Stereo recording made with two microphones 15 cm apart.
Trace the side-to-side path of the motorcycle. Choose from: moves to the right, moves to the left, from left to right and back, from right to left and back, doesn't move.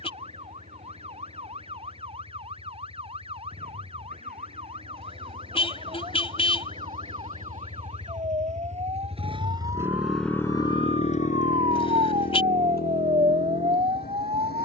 moves to the left.